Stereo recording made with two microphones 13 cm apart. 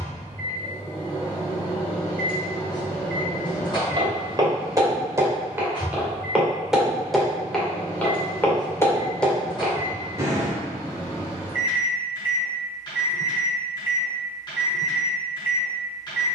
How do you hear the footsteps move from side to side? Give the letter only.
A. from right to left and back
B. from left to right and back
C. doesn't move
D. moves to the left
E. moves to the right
A.